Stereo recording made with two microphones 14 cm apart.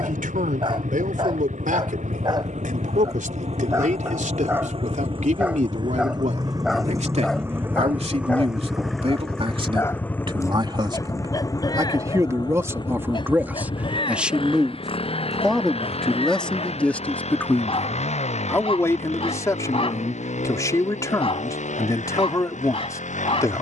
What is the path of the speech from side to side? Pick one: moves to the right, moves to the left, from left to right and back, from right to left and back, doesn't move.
moves to the left.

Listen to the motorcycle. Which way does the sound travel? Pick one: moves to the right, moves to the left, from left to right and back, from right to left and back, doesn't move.
moves to the left.